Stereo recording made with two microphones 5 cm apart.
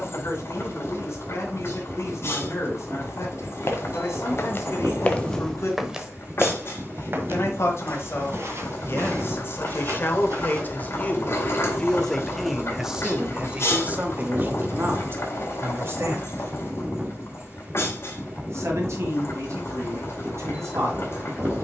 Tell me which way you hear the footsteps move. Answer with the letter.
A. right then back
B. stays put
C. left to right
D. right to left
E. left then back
C.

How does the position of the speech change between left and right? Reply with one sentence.
In this clip you hear the speech travel towards the right.